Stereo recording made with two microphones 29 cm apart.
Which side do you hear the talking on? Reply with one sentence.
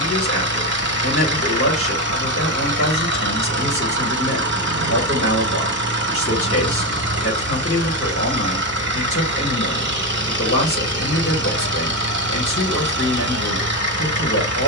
In this clip you hear the talking on the left.